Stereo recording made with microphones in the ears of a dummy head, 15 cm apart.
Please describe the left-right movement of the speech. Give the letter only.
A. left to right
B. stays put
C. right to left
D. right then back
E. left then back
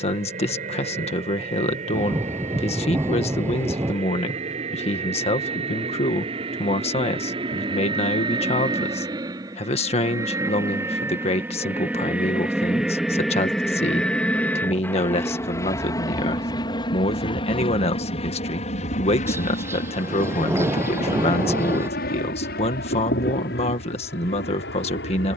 B.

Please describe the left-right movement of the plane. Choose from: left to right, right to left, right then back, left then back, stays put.
right to left.